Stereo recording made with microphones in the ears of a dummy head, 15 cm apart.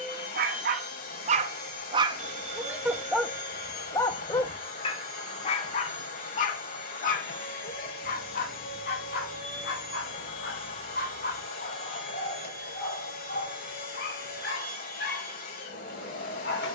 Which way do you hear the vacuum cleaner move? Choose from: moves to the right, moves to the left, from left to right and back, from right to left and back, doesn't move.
doesn't move.